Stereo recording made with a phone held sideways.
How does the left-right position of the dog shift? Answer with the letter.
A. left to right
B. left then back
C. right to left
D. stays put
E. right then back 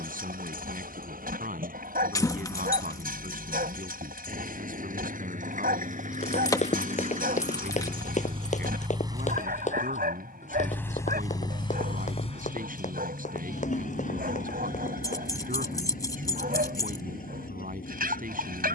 D.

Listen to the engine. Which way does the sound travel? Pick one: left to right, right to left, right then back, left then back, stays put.
right to left.